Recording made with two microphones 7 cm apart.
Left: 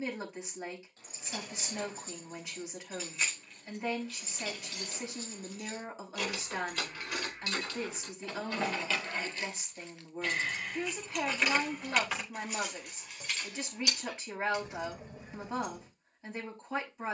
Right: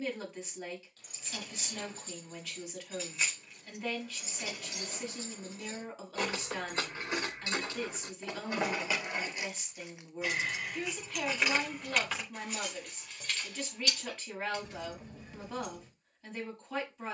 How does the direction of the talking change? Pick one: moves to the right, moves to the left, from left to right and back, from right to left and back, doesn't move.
doesn't move.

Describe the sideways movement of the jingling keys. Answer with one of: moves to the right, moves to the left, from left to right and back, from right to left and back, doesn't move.
from left to right and back.